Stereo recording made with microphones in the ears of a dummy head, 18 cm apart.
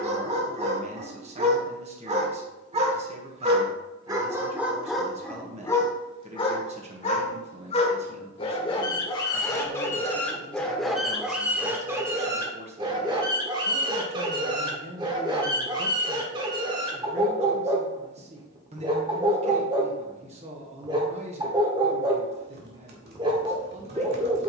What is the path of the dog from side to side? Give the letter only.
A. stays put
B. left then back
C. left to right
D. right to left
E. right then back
B.